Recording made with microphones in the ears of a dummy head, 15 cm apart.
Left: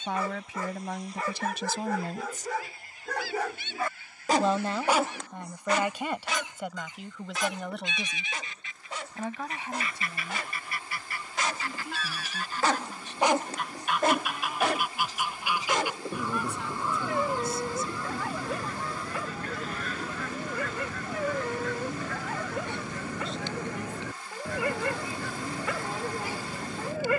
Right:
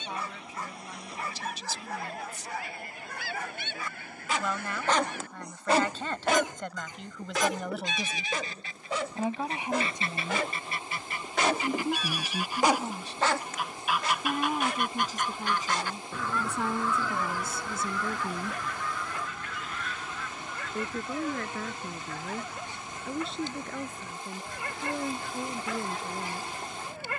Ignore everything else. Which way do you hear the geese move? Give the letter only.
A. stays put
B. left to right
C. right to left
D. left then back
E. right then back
C.